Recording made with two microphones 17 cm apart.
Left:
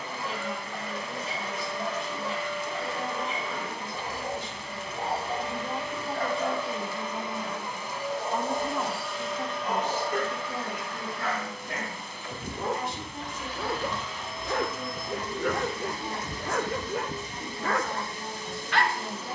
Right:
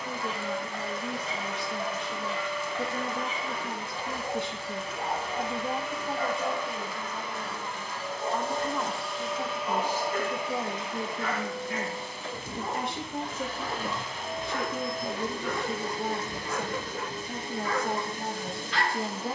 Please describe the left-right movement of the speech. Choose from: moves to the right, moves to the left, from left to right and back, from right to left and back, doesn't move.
from right to left and back.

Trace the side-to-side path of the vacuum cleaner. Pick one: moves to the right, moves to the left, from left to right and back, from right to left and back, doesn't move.
moves to the right.